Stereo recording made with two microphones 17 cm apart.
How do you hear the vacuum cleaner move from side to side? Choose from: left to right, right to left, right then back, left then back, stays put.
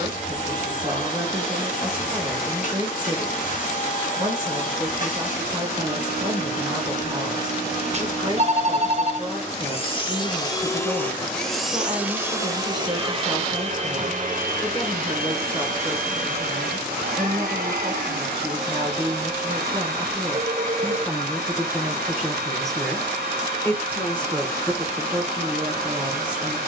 left to right.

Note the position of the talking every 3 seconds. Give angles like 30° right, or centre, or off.
30° right, 30° right, 30° right, 30° right, 30° right, 30° right, 20° right, centre, 20° right.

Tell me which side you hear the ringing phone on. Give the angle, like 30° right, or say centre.
40° right.